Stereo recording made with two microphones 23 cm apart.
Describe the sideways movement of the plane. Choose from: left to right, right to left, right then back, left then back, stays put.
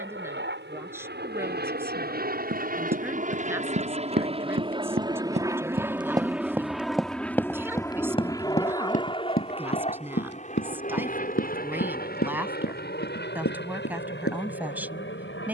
right to left.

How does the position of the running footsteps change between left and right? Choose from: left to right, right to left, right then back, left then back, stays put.
right to left.